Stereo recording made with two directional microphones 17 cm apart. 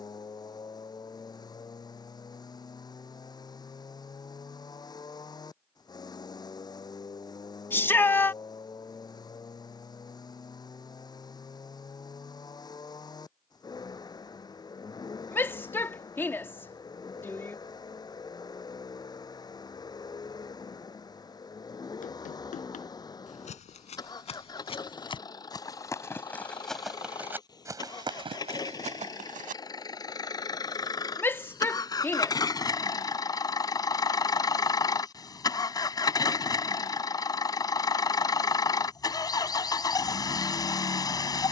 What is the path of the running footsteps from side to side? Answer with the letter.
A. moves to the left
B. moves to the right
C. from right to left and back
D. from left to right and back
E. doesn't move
B.